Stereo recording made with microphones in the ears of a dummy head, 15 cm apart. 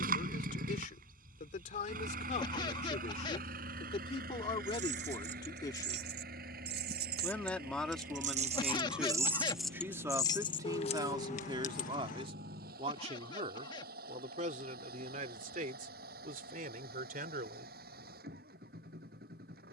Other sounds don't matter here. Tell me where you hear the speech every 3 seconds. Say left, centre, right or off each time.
left, left, centre, right, right, right, off.